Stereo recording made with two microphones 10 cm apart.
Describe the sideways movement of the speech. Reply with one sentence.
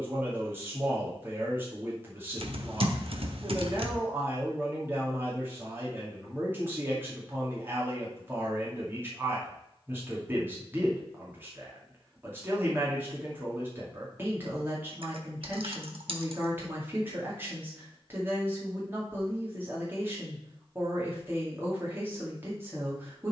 You can hear the speech stay in one place.